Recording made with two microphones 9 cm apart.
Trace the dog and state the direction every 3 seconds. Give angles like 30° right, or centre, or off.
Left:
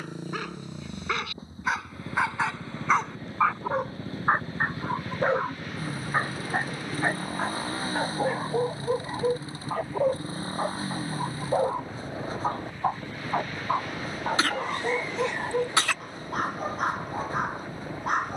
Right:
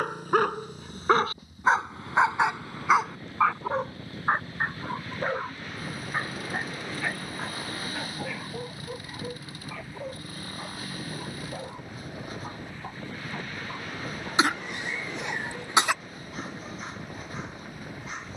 30° right, 10° left, 40° left, 50° left, 50° left, 50° left.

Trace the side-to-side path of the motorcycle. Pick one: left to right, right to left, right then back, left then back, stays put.
stays put.